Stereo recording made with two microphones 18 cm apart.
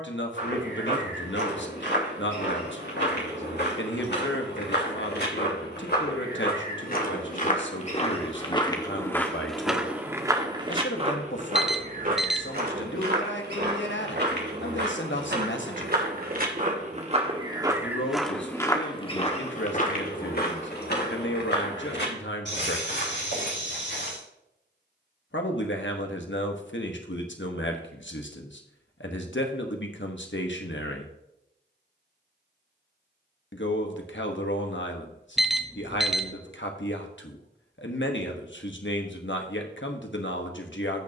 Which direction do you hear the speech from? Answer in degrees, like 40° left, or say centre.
80° left.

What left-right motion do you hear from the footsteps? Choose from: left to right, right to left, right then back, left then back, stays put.
right then back.